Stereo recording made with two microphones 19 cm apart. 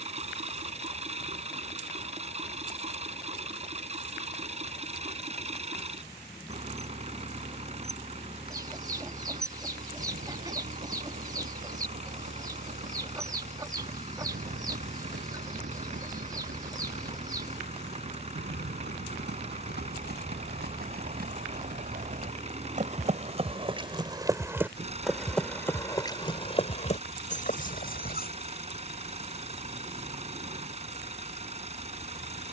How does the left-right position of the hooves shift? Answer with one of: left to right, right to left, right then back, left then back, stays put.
right to left.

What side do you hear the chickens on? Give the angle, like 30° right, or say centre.
20° right.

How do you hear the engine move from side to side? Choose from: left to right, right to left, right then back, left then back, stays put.
stays put.